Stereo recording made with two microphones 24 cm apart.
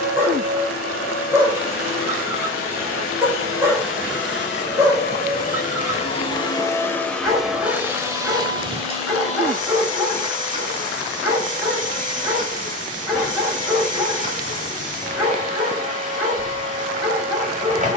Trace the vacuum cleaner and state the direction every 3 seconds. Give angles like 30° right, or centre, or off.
60° left, 50° left, centre, 30° right, 30° right, 30° right.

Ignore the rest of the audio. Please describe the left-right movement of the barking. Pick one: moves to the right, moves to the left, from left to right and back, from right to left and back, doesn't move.
doesn't move.